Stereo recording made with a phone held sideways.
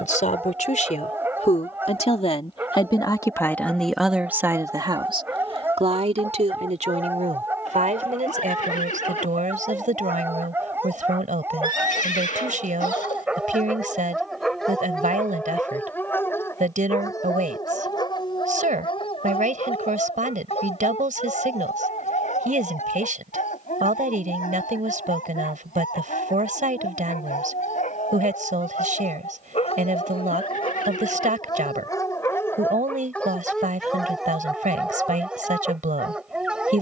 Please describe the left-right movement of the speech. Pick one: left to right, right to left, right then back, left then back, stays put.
left to right.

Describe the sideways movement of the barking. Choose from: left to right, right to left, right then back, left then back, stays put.
left then back.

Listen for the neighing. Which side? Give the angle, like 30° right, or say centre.
70° left.